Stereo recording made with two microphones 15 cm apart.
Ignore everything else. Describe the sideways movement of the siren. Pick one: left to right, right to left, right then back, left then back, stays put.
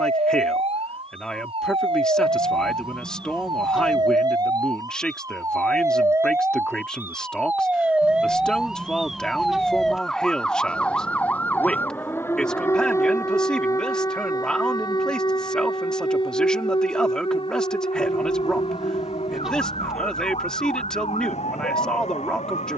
right to left.